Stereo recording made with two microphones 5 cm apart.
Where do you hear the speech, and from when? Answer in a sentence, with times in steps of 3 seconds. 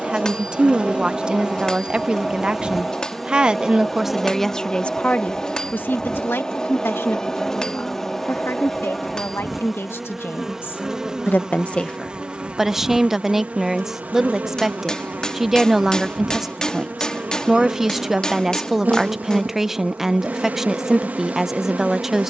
You can hear the speech on the right from 0 s, in the centre from 3 s, on the left from 6 s and in the centre from 12 s.